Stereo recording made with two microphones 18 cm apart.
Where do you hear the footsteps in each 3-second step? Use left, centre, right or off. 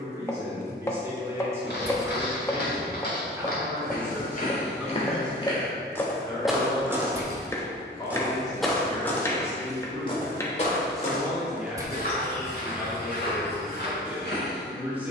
left, left, centre, left, left.